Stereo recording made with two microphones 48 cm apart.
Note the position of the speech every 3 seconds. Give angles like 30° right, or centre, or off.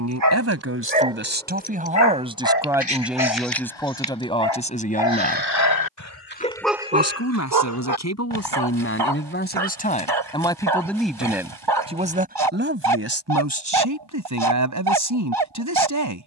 20° right, 10° left, 30° left, 10° left, 30° right, 40° right.